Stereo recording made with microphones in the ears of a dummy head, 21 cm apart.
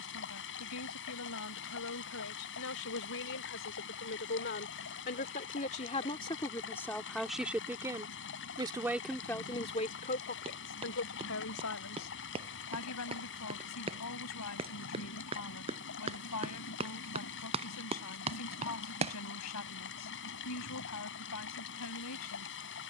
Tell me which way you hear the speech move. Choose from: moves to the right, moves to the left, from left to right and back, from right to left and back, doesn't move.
from left to right and back.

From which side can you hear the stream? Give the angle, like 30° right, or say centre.
60° left.